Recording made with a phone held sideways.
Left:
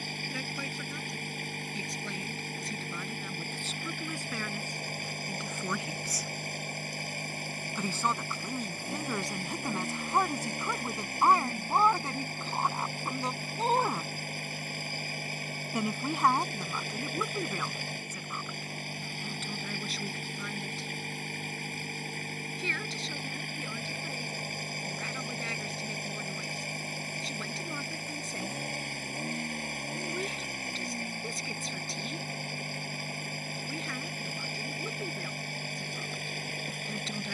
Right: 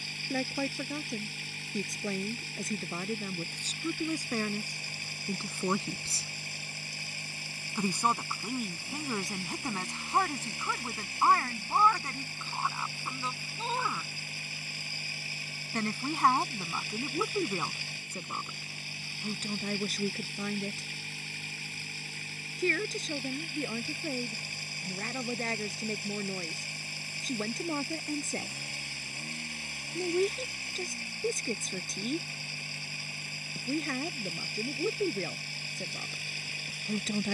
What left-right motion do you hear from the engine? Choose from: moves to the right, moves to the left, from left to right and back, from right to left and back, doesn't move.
doesn't move.